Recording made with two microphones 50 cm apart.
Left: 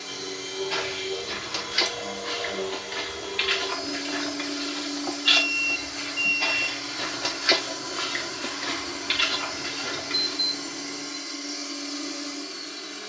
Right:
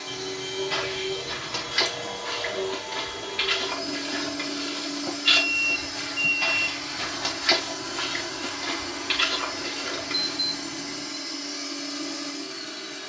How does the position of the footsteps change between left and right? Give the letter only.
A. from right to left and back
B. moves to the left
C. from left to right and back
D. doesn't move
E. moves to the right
B.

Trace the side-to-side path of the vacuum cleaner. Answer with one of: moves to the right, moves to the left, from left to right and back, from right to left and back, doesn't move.
doesn't move.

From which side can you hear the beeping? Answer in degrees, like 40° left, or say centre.
40° right.